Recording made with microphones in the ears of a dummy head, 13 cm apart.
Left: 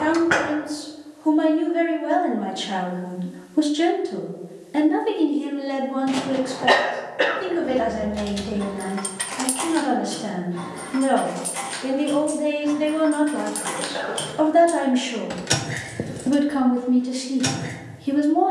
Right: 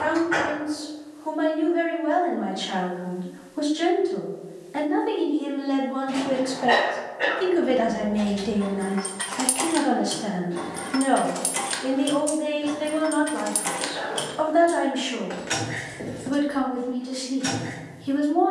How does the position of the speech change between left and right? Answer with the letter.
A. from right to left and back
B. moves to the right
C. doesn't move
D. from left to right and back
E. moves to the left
D.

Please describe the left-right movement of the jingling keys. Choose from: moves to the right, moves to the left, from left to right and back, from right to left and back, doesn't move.
from left to right and back.